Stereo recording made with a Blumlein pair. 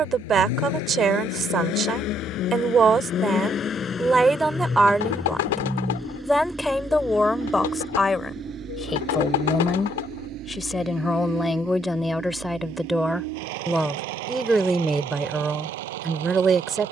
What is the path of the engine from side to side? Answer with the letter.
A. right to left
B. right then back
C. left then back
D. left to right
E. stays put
D.